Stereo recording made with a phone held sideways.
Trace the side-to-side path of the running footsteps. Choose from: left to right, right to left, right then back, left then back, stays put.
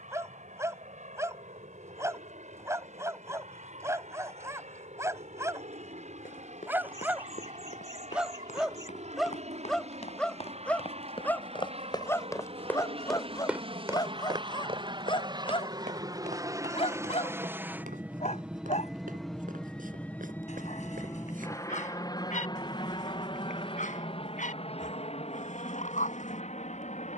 left to right.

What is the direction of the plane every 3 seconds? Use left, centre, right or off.
right, right, right, right, right, right, centre, left, left.